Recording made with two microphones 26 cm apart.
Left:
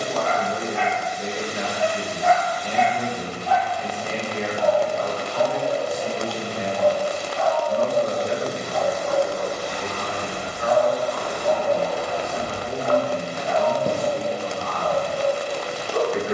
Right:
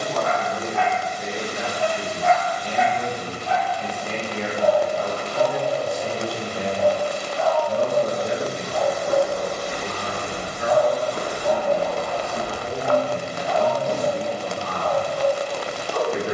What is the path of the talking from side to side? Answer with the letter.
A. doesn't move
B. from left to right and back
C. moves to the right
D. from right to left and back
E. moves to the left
C.